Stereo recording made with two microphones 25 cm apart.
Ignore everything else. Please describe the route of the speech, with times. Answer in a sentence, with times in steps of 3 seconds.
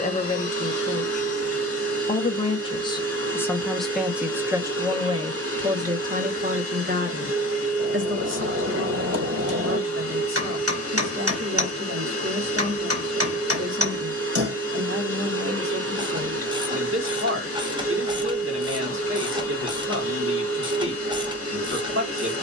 You can hear the speech on the left from 0 s, in the centre from 3 s and on the right from 6 s.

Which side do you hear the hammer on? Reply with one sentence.
You can hear the hammer on the right.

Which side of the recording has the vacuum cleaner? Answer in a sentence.
You can hear the vacuum cleaner on the right.